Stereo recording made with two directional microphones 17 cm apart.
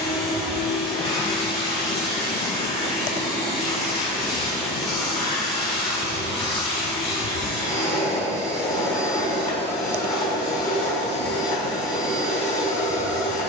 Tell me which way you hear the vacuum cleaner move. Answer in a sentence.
In this clip you hear the vacuum cleaner stay in one place.